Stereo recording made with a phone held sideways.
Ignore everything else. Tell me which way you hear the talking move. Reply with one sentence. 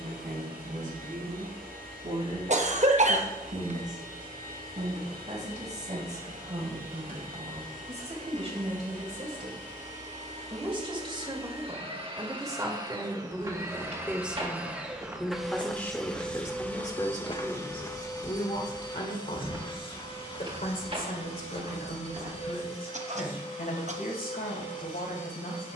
You can hear the talking travel towards the left.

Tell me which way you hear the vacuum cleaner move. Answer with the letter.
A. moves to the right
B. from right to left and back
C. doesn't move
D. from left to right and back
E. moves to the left
E.